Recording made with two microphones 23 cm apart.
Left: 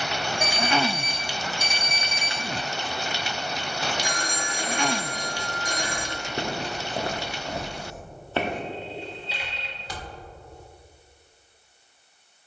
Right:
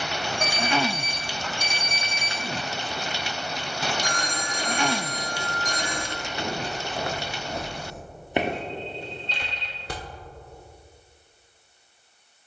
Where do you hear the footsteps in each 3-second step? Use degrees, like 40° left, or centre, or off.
off, 60° left, 30° left, 50° right.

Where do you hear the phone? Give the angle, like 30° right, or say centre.
10° left.